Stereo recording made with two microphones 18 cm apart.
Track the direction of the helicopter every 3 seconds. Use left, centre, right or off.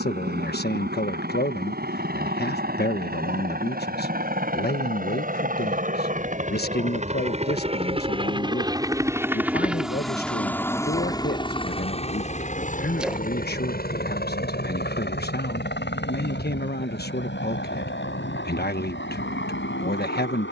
right, right, right, centre, left, left, left.